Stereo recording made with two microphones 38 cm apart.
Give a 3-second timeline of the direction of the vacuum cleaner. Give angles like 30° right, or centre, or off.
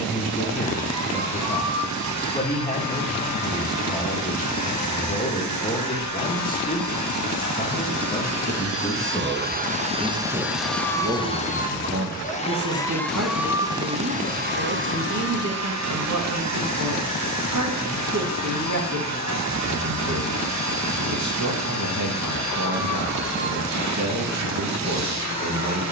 50° right, 50° right, 50° right, 10° right, 10° right, 40° right, 50° right, 50° right, 50° right.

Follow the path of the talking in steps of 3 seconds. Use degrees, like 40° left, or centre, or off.
20° left, 20° left, 20° left, 10° right, 40° right, 50° right, 50° right, 50° right, 50° right.